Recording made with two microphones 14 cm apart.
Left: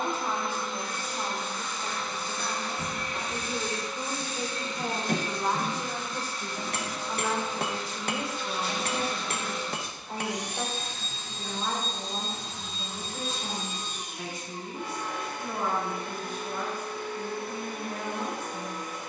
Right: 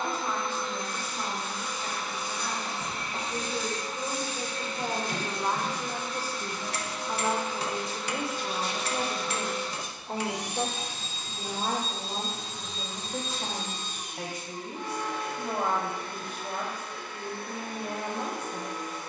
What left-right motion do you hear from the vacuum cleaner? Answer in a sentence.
In this clip you hear the vacuum cleaner go right and come back.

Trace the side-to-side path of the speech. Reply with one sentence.
You can hear the speech move from left to right.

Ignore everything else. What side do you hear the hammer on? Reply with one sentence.
In this clip you hear the hammer on the left.